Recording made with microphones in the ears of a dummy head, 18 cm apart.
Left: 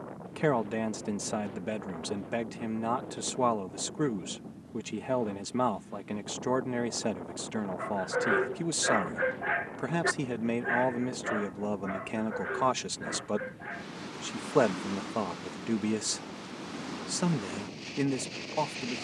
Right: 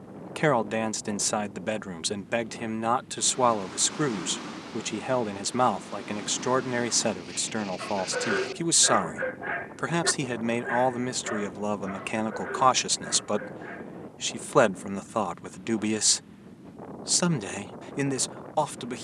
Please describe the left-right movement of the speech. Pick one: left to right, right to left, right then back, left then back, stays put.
stays put.